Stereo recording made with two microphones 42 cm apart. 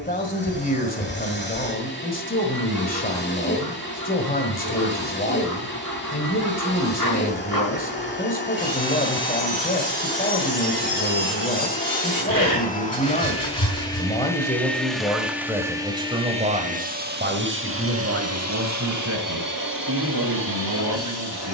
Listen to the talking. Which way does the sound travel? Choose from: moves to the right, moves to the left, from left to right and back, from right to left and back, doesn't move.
moves to the right.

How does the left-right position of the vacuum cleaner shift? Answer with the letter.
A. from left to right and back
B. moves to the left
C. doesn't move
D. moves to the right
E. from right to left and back
D.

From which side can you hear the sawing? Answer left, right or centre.
left.